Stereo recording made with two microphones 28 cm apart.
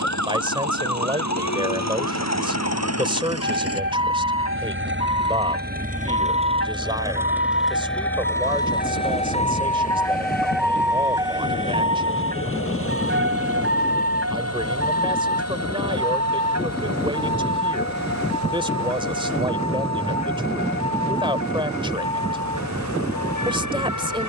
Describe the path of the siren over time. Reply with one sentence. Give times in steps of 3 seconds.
In this clip you hear the siren on the left from 0 s, in the centre from 9 s and on the right from 12 s.